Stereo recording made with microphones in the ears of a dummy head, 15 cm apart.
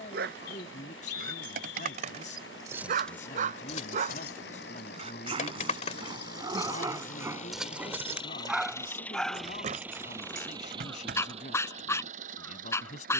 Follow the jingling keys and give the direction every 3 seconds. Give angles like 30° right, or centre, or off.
40° right, 40° left, centre, 50° right, off.